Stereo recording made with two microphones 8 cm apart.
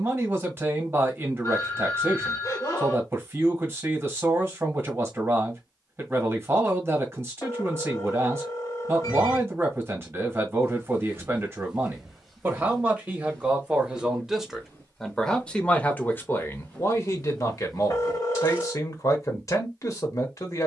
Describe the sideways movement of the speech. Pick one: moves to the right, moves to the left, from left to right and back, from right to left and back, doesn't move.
moves to the left.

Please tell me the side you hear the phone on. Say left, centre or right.
left.